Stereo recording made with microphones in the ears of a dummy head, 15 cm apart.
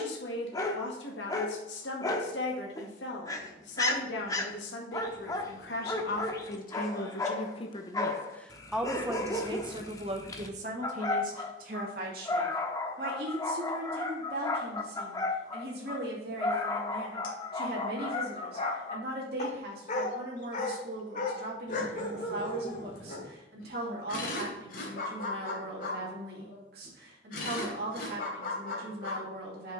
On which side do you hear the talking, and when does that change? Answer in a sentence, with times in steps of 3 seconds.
You can hear the talking on the left from 0 s and on the right from 9 s.